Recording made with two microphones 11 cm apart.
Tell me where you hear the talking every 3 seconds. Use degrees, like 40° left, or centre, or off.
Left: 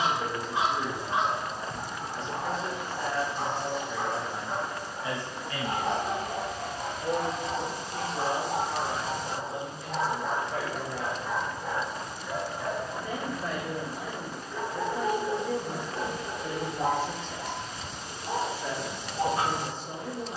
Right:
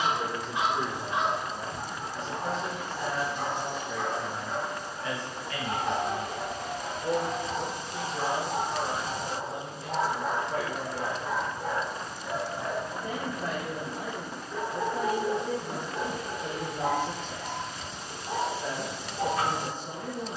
40° right, 10° left, 10° right, 40° right, 50° right, 50° right, 50° right.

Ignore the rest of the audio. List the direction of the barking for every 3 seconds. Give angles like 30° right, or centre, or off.
30° left, 30° left, 30° left, 40° right, 30° right, 10° left, 30° left.